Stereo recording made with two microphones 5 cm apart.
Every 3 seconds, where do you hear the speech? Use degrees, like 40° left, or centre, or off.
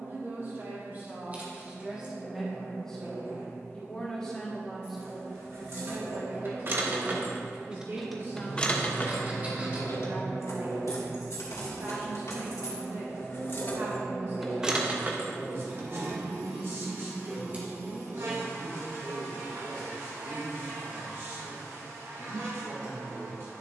30° right, centre, 40° right, 50° right, 50° right, 50° right, 50° right, 50° right.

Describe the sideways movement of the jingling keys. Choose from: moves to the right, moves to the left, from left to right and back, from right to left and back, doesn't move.
from right to left and back.